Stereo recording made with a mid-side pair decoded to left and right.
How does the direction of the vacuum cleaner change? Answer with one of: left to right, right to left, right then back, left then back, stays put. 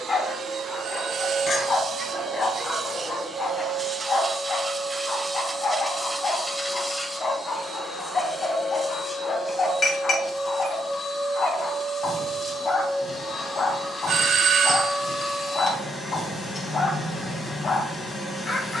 right to left.